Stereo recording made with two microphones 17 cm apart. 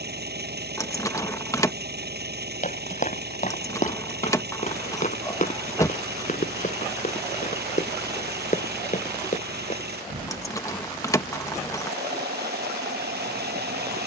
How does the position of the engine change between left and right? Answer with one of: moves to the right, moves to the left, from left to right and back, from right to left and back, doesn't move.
doesn't move.